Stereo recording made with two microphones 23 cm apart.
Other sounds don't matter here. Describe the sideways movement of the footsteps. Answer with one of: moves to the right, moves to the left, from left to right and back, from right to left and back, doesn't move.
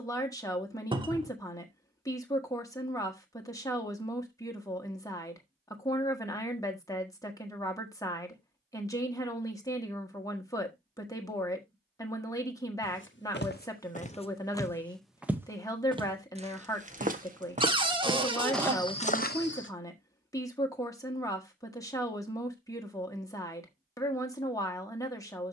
from left to right and back.